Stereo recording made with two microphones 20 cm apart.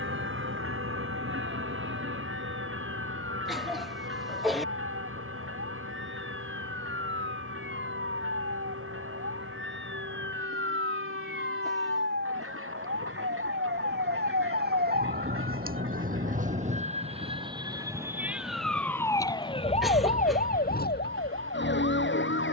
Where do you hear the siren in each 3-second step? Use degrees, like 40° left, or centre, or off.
80° right, 70° right, 70° right, 70° right, 60° right, 40° right, 20° left, 60° left.